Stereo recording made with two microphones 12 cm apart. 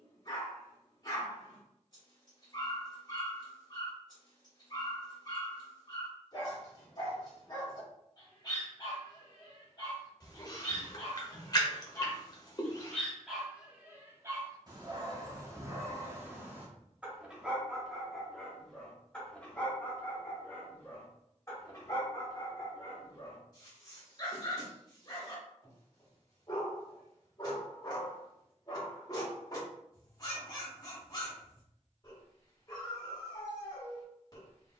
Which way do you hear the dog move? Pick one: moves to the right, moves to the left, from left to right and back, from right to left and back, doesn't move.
from left to right and back.